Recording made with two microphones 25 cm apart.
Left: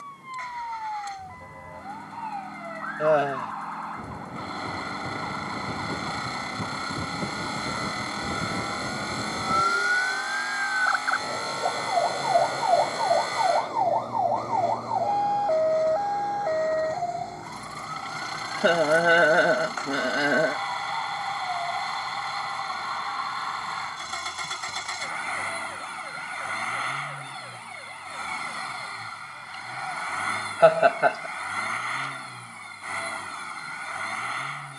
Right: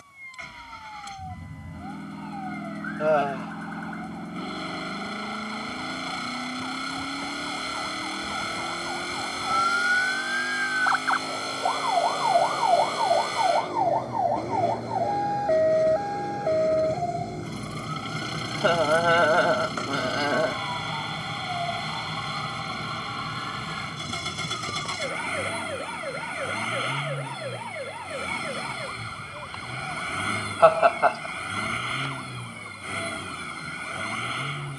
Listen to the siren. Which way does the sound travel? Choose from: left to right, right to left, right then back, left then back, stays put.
left to right.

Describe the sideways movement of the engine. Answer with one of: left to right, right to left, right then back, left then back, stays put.
stays put.